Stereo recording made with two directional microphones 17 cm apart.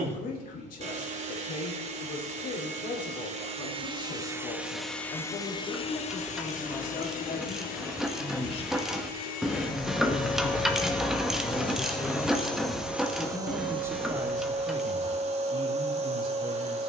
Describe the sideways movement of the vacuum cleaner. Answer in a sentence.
In this clip you hear the vacuum cleaner go left and come back.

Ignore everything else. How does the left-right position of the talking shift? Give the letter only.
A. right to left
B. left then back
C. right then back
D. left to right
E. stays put
D.